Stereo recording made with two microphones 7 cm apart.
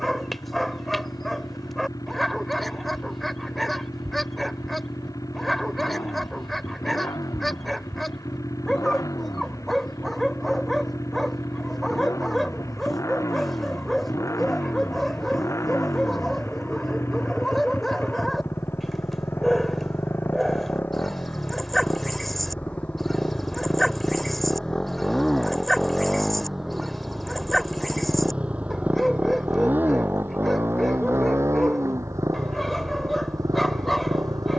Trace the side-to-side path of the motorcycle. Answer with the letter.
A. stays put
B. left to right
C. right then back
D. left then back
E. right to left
B.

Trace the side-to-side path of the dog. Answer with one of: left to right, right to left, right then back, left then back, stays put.
stays put.